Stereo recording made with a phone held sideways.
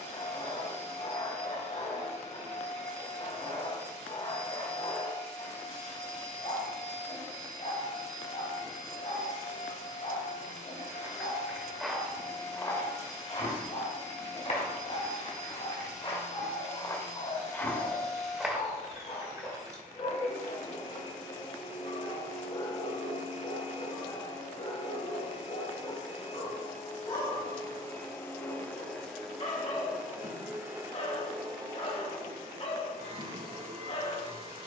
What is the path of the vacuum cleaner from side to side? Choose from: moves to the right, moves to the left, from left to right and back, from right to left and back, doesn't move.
moves to the right.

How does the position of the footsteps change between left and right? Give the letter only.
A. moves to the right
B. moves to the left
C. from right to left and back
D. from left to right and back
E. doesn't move
C.